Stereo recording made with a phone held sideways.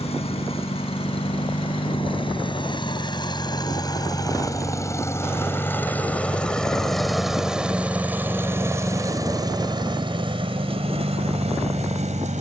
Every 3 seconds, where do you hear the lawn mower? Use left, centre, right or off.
left, left, centre, right.